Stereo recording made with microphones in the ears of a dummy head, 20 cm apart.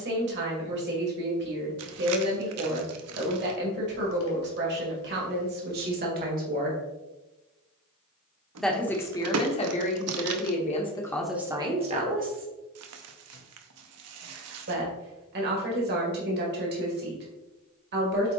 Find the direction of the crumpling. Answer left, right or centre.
right.